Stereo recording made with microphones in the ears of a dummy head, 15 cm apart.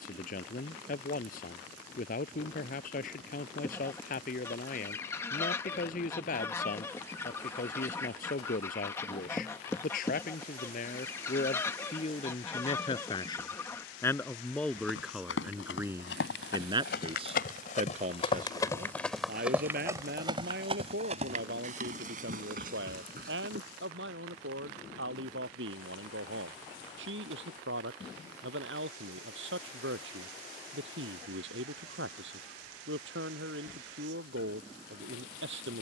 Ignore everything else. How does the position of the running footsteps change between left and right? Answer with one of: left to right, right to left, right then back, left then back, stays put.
left to right.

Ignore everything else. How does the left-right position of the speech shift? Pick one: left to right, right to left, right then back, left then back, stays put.
left to right.